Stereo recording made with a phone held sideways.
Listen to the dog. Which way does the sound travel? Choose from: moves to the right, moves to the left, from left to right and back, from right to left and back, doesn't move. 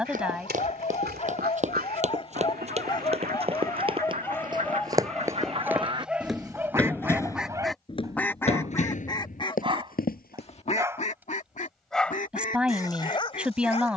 from left to right and back.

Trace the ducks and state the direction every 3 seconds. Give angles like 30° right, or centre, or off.
70° right, 50° right, centre, 40° left, 50° left.